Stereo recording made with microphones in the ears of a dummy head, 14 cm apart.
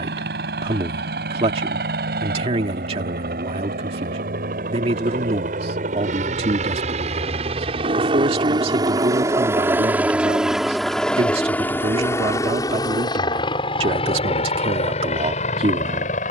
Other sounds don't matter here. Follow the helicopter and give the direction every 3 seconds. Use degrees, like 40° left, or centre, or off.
70° right, 60° right, 40° right, centre, 30° left, 40° left.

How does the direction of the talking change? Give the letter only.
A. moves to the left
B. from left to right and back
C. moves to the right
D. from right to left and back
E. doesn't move
E.